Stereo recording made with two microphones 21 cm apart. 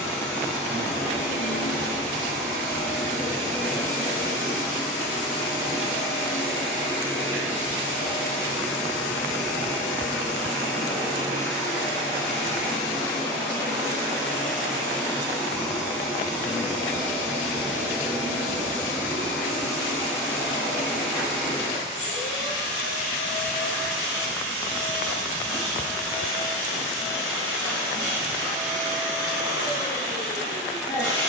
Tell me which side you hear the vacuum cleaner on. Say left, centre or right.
centre.